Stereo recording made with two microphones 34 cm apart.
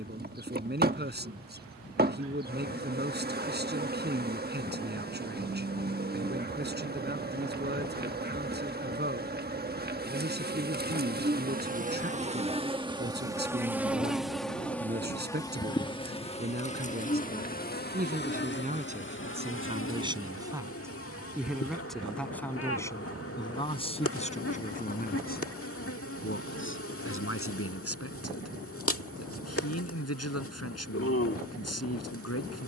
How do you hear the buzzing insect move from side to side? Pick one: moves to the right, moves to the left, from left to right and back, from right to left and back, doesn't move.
moves to the left.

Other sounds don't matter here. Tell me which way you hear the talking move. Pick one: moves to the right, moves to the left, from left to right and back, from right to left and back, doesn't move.
moves to the left.